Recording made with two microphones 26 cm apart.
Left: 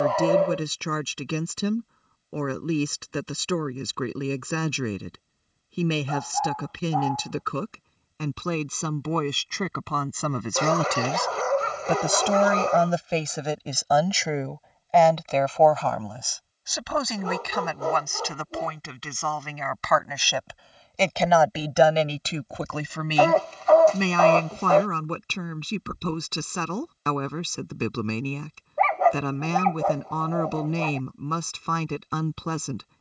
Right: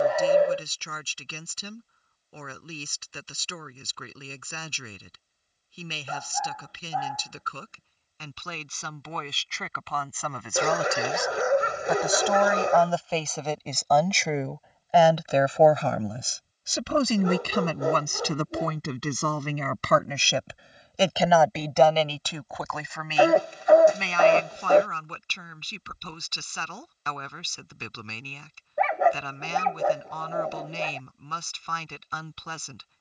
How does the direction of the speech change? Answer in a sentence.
You can hear the speech go right and come back.